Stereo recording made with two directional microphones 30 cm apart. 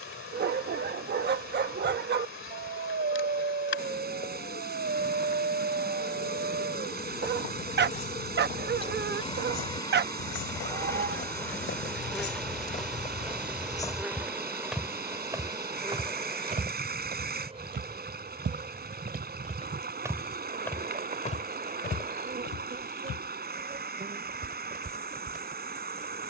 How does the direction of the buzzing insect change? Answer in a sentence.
In this clip you hear the buzzing insect travel towards the right.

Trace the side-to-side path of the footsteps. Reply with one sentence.
You can hear the footsteps go right and come back.